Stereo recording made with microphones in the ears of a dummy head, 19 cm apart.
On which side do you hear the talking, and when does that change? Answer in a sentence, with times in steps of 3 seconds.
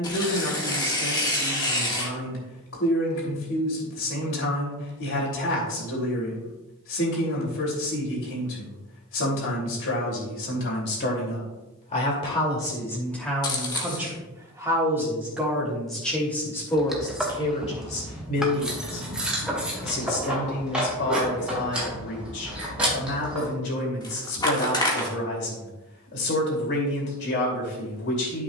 You can hear the talking on the left from 0 s, in the centre from 12 s and on the left from 18 s.